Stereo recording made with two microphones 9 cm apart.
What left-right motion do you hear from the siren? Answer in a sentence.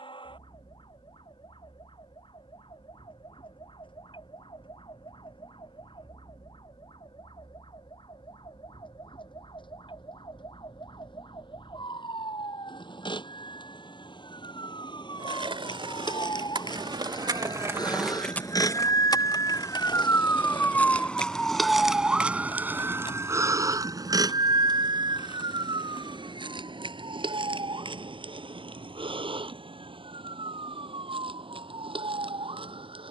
You can hear the siren travel towards the right.